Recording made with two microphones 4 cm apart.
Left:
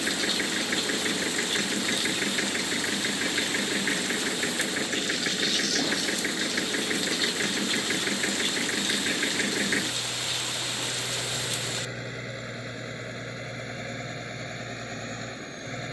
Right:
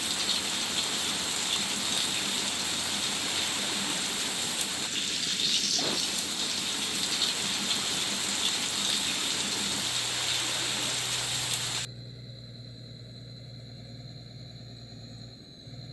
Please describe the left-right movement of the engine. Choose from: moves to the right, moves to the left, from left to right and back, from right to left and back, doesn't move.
doesn't move.